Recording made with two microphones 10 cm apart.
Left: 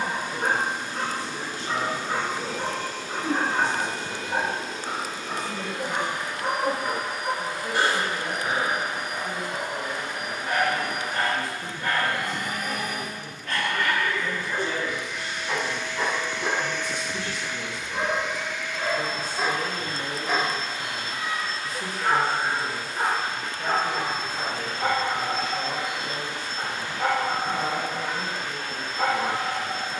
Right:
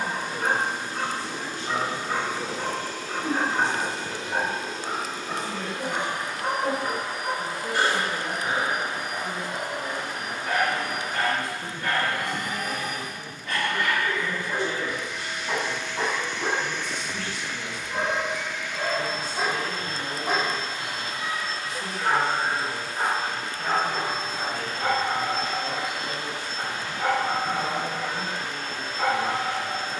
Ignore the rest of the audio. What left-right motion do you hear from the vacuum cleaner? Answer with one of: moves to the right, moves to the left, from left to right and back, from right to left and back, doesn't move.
doesn't move.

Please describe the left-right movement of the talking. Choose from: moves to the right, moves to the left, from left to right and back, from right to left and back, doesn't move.
from right to left and back.